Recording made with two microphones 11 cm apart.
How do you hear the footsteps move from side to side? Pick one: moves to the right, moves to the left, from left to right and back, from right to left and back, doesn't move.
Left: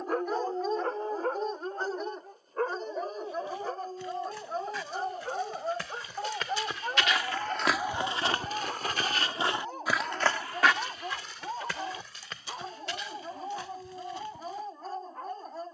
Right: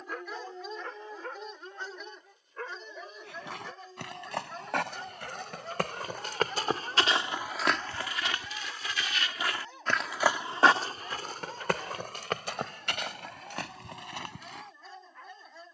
from right to left and back.